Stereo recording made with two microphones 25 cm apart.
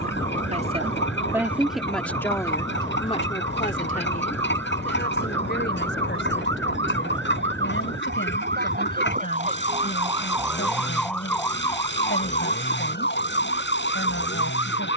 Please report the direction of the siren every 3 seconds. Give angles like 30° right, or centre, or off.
70° right, 70° right, 50° right, 10° right, 50° left.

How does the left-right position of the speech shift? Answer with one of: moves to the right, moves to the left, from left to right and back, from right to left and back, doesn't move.
moves to the left.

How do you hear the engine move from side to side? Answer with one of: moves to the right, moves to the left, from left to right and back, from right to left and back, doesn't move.
doesn't move.